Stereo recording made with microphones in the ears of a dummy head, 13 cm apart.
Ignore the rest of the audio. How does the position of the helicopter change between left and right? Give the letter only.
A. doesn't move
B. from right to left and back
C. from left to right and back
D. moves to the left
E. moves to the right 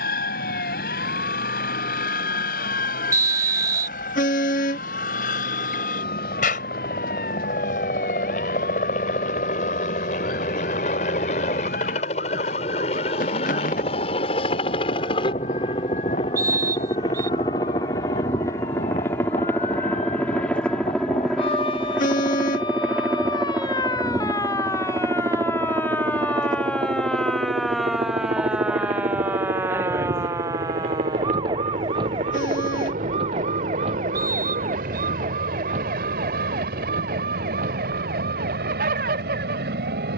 E.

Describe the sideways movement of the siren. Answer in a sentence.
In this clip you hear the siren move to the right.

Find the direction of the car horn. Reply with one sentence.
You can hear the car horn on the left.